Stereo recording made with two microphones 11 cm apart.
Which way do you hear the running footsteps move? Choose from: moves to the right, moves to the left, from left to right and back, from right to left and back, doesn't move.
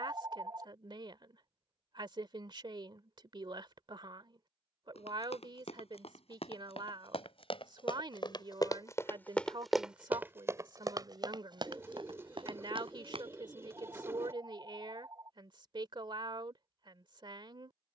moves to the right.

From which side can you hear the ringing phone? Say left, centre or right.
right.